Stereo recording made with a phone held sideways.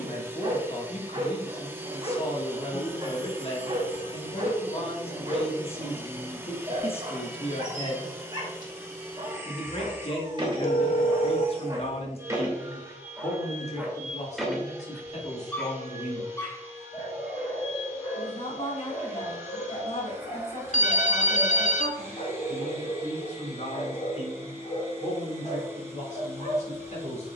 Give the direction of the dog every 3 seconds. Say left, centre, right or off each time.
right, right, right, right, centre, left, left, left, left.